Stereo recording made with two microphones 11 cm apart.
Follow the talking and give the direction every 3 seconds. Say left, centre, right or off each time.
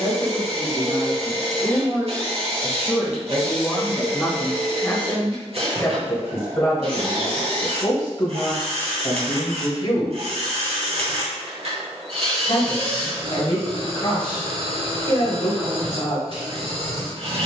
right, centre, left, left, left, left.